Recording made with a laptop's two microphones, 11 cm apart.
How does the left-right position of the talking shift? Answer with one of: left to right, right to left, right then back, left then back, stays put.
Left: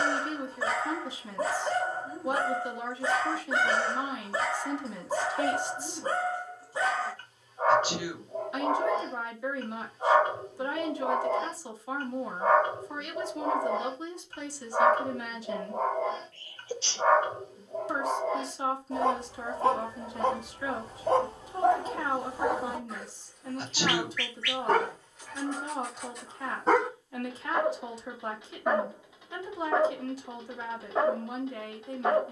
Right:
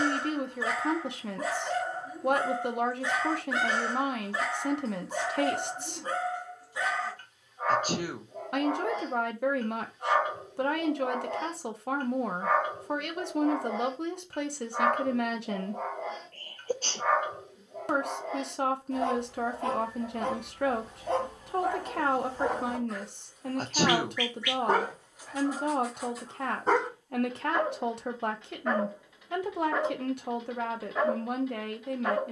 stays put.